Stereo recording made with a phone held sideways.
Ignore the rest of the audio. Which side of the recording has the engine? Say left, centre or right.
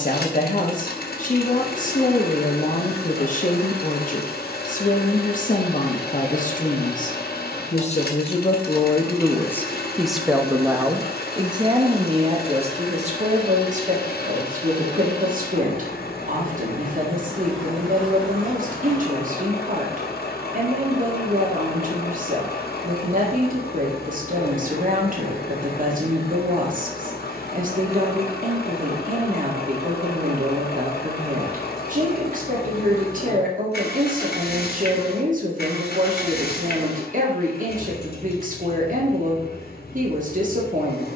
left.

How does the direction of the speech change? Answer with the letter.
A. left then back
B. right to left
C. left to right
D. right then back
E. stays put
C.